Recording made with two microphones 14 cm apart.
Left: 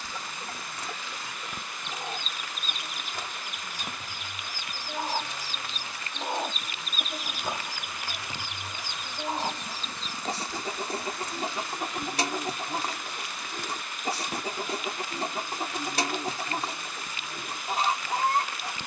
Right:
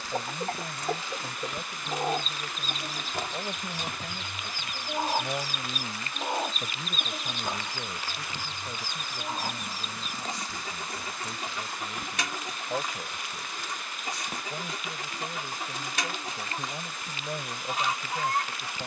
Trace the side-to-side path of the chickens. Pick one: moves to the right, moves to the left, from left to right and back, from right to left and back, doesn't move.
moves to the left.